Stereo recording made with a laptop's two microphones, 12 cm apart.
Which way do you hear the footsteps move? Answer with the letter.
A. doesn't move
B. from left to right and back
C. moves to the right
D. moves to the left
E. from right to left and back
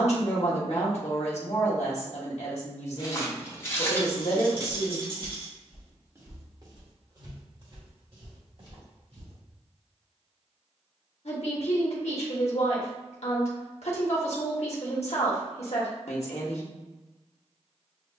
C.